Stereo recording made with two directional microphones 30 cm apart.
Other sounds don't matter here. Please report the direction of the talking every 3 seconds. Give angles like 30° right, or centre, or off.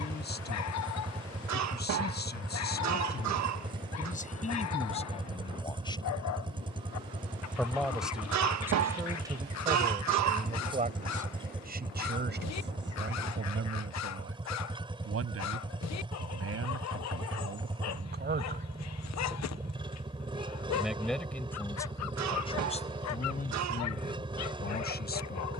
30° left, 20° left, centre, 20° right, 40° right, 50° right, 20° right, 20° left, 30° left.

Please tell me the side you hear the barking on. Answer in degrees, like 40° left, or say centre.
60° left.